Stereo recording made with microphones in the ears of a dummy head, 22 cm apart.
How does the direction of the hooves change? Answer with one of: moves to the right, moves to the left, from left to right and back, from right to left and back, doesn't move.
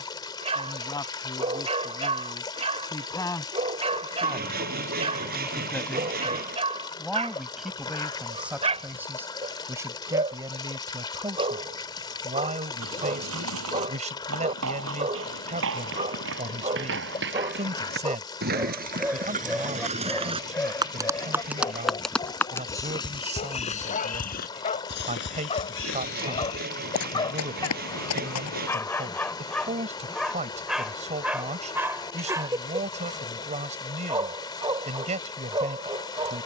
moves to the left.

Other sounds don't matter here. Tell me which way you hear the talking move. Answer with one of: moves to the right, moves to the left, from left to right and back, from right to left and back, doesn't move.
moves to the right.